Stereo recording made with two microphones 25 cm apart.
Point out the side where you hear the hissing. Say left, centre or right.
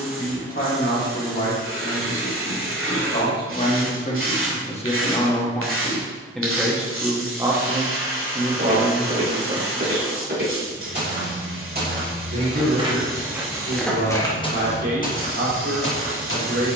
right.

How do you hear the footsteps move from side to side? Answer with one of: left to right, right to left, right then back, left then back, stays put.
right to left.